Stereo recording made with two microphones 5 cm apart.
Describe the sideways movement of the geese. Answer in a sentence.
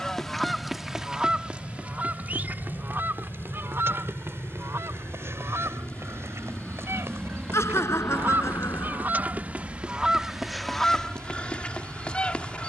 In this clip you hear the geese move from left to right and back again.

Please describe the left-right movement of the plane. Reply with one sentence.
In this clip you hear the plane move to the right.